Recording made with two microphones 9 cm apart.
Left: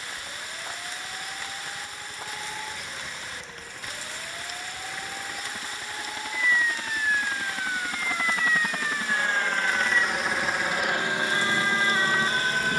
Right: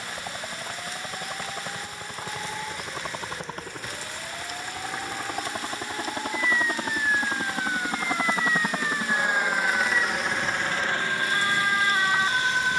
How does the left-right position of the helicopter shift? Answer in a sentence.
You can hear the helicopter go from the right side to the left.